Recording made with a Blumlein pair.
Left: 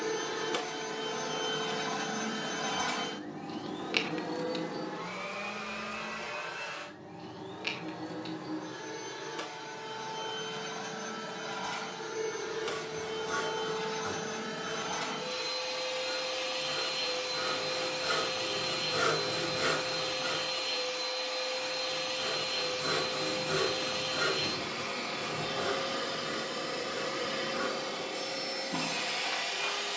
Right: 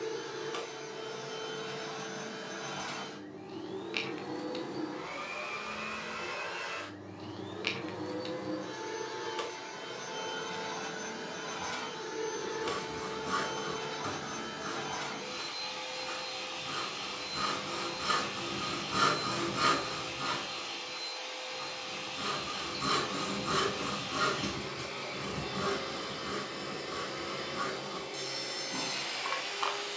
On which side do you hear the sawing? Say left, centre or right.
right.